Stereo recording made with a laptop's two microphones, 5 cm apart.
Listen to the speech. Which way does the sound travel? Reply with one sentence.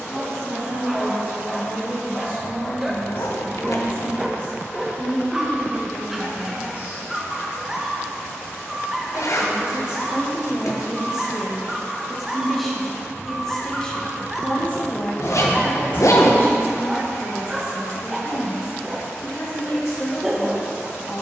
In this clip you hear the speech travel towards the left.